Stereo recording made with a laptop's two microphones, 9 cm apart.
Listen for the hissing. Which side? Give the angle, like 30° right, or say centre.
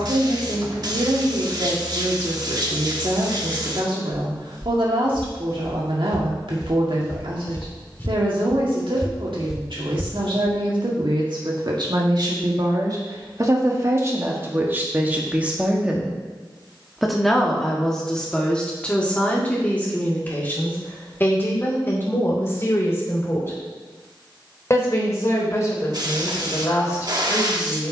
50° right.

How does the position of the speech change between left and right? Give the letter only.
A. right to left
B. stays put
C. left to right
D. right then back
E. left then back
A.